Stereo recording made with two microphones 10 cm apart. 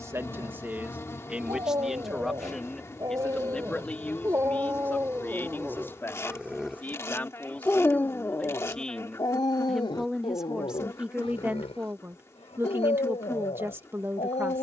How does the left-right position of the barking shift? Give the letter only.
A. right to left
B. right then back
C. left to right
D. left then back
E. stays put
A.